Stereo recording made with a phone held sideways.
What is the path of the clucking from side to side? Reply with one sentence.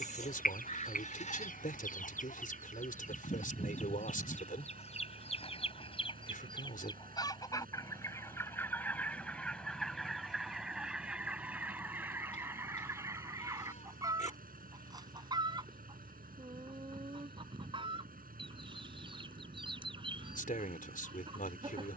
In this clip you hear the clucking move to the right.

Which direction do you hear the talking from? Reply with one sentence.
You can hear the talking on the left.